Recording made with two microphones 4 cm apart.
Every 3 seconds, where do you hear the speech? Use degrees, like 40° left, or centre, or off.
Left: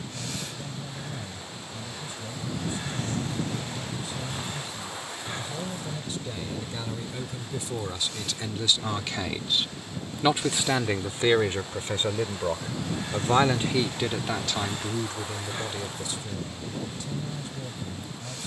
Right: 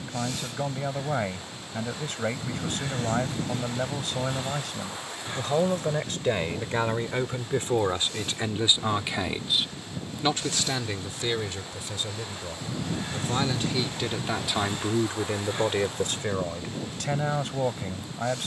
70° right, 70° right, 50° right, 20° left, 20° left, 60° right.